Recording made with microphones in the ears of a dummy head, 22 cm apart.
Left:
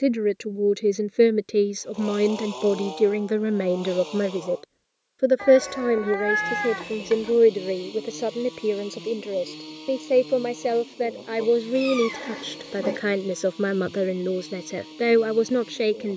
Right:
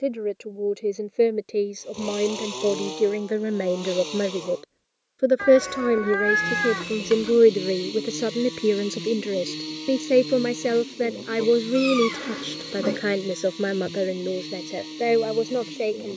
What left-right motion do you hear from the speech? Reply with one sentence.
You can hear the speech go right and come back.